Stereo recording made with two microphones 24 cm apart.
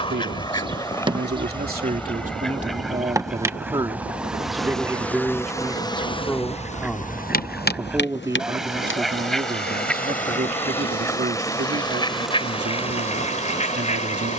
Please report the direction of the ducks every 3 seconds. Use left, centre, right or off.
centre, centre, centre, centre, left.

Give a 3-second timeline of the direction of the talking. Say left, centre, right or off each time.
right, centre, centre, right, right.